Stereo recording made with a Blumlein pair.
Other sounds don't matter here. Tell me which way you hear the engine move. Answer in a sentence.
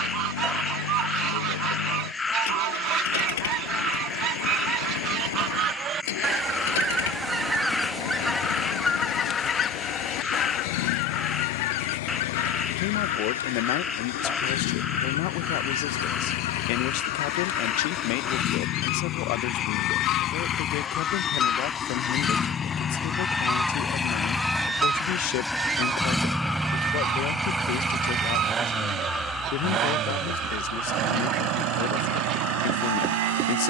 In this clip you hear the engine travel towards the right.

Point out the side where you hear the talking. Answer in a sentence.
You can hear the talking on the left.